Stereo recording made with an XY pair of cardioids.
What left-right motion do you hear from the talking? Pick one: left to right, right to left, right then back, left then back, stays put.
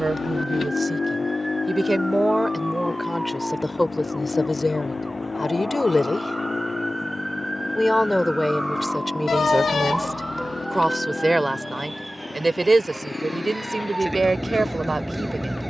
left then back.